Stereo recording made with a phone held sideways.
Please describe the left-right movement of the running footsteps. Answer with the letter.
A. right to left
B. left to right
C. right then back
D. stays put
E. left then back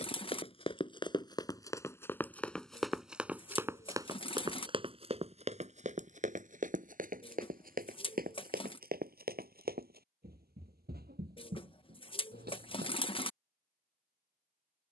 B.